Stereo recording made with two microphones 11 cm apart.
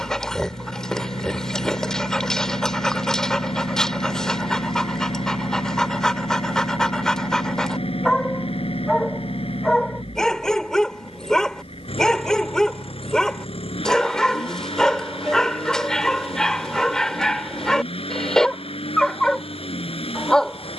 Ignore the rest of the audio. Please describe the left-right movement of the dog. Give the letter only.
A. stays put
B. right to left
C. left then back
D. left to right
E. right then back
A.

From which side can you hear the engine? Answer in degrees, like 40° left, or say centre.
70° left.